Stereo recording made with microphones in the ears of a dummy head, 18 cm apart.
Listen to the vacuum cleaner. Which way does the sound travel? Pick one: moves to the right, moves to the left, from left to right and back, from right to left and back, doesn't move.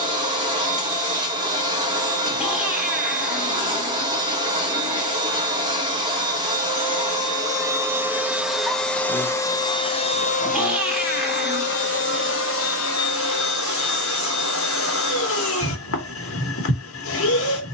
moves to the left.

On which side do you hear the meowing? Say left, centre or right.
centre.